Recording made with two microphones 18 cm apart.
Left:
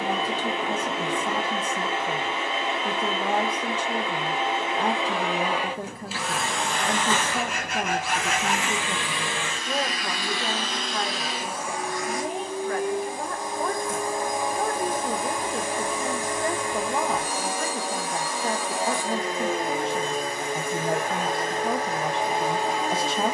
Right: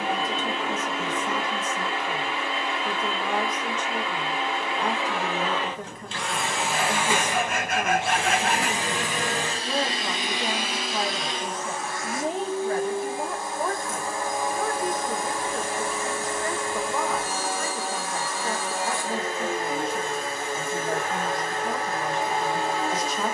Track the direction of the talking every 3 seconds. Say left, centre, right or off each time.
left, left, left, centre, centre, left, left, left.